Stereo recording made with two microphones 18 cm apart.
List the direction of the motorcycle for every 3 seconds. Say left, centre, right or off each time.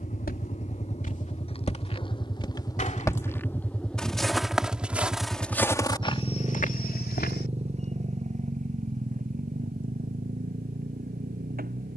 left, centre, right, right.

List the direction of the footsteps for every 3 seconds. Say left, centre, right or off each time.
left, centre, left, off.